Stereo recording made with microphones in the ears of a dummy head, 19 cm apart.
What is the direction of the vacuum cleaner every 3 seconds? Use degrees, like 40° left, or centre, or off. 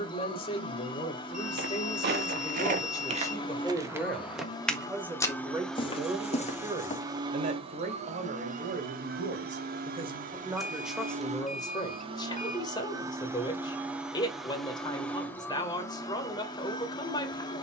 20° left, 20° left, 20° right, 40° right, 10° right, 20° left.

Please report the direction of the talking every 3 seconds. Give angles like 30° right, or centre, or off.
30° left, centre, 40° right, 10° right, 20° left, 20° left.